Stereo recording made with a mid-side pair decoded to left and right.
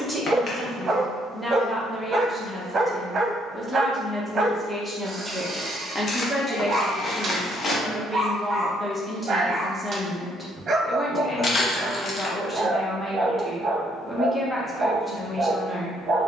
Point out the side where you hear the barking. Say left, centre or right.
right.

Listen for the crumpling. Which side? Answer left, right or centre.
left.